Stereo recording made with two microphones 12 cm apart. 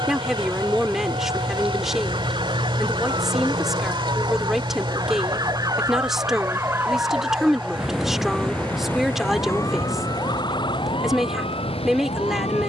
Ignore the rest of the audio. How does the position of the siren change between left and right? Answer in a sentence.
In this clip you hear the siren move from right to left.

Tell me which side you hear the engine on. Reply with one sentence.
You can hear the engine on the right.